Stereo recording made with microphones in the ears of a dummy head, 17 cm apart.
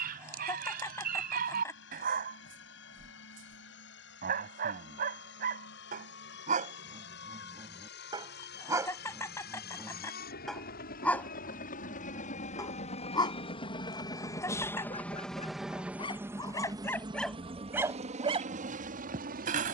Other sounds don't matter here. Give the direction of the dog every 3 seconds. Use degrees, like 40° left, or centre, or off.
50° right, 50° right, 30° right, centre, 20° left, 10° left, 40° right.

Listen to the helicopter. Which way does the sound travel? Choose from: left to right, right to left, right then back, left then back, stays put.
left to right.